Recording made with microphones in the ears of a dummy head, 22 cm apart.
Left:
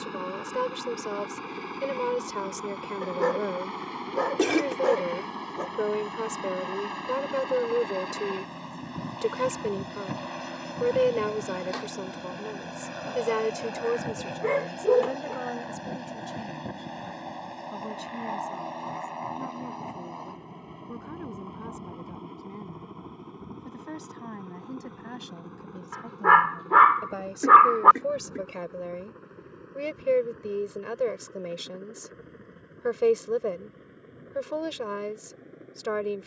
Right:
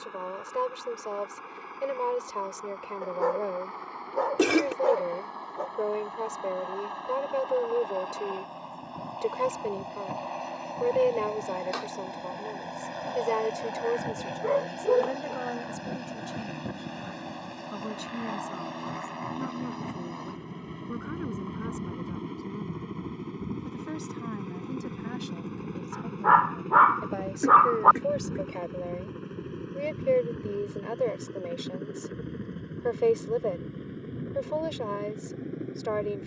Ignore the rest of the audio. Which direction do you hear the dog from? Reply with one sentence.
You can hear the dog on the left.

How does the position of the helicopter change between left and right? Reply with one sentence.
In this clip you hear the helicopter travel towards the right.